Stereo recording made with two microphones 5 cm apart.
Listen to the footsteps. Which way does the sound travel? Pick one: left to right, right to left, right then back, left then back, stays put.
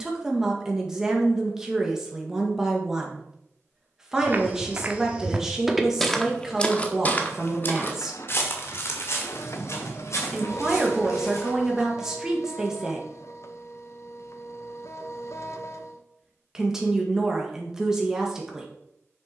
right to left.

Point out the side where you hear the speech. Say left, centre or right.
centre.